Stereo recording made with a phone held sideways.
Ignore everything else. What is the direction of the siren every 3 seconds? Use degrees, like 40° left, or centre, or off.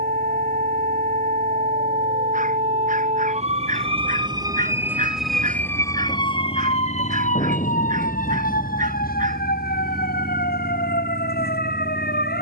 60° right, 20° right, 50° left, 70° left.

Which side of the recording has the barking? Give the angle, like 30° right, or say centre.
60° right.